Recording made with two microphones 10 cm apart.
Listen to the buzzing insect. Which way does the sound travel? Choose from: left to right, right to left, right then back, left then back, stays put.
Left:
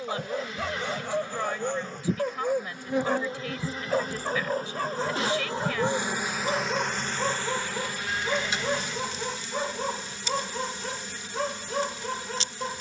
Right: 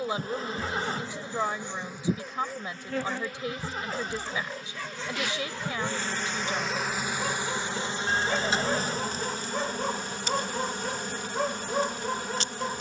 left then back.